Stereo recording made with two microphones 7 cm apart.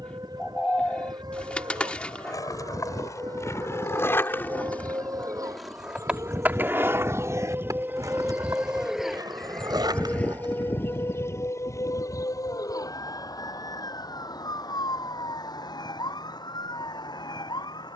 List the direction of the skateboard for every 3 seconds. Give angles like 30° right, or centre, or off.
50° left, 20° left, 40° right, 70° right, off, off.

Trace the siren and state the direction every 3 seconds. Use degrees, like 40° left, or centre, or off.
70° right, 60° right, 30° right, 20° left, 60° left, 70° left.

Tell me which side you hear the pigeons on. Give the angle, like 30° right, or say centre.
10° left.